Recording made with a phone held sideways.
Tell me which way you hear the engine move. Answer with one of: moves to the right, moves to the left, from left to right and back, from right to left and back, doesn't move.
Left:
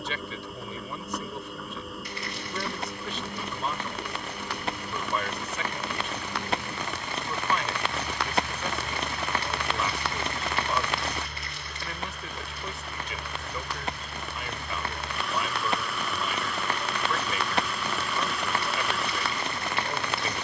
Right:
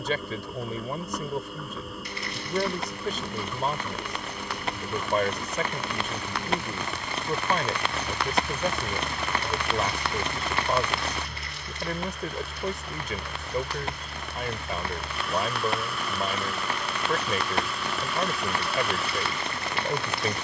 doesn't move.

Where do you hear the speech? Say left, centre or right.
right.